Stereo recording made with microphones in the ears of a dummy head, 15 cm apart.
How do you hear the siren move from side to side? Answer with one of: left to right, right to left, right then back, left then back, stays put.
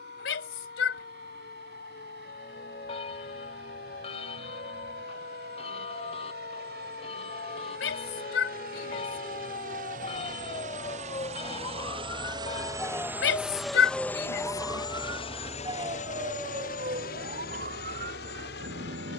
left to right.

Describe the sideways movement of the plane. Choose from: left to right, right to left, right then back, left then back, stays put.
right to left.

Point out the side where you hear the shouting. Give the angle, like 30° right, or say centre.
80° left.